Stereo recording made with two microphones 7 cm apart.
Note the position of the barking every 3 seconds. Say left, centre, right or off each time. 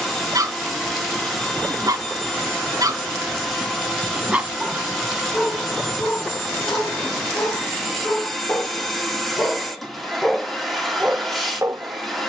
right, centre, left, centre.